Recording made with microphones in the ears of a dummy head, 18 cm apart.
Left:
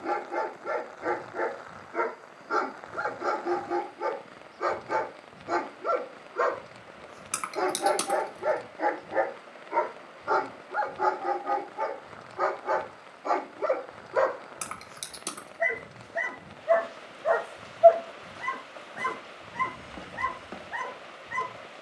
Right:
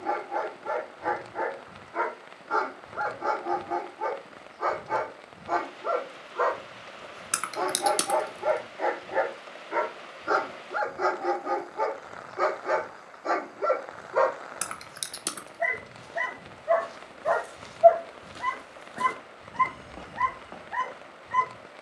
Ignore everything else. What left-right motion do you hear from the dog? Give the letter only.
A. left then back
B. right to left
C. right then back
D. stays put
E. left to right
C.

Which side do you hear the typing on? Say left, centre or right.
centre.